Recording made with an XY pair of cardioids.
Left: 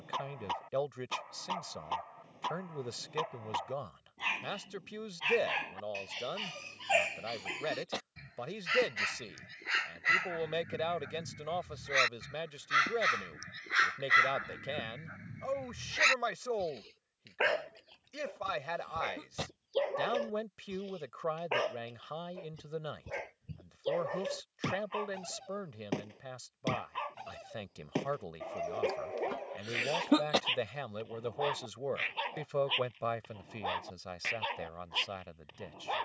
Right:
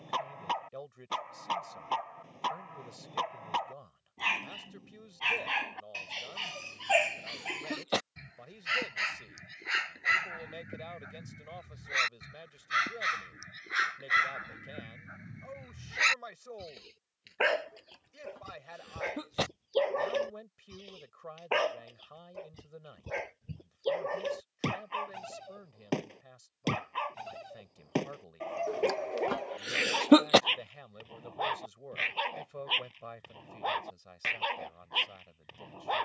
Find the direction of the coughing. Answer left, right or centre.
right.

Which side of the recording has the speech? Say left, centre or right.
left.